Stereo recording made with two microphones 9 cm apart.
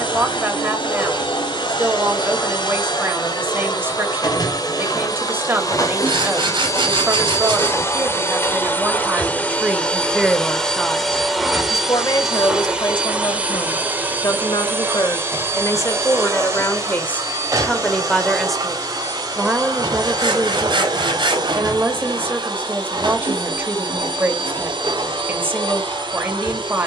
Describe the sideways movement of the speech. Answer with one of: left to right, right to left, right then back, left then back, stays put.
left then back.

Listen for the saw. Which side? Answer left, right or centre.
right.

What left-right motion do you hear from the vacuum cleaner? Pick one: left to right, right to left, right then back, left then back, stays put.
left to right.